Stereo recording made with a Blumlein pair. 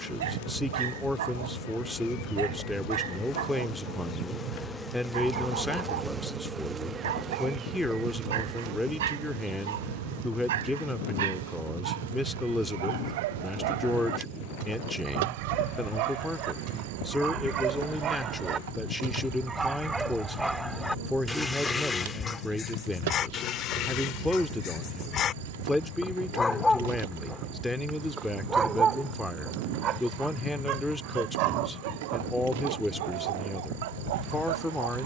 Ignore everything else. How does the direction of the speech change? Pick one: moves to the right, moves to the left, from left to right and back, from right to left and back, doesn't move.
doesn't move.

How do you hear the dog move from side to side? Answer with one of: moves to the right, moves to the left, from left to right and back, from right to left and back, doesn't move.
from right to left and back.